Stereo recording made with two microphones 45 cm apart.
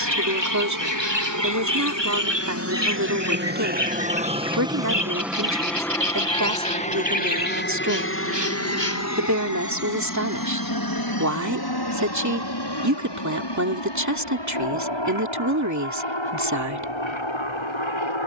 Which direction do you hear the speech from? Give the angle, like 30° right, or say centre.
40° right.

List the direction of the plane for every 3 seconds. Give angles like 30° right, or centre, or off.
40° right, 10° right, 20° left, 40° left, 50° left, 60° left.